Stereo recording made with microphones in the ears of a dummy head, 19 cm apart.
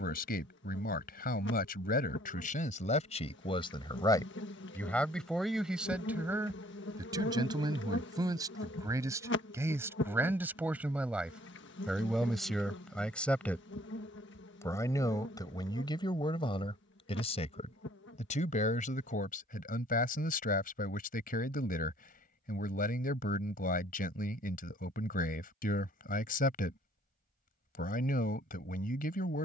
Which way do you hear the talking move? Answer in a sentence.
In this clip you hear the talking move from left to right and back again.